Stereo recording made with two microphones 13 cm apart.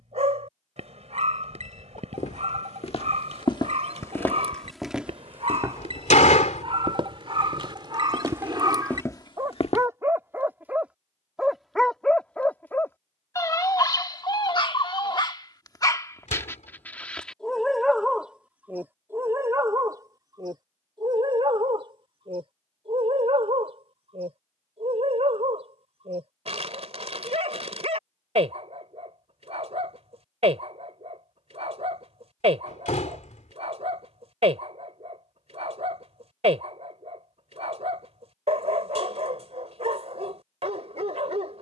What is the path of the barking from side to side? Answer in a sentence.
You can hear the barking move from right to left and back again.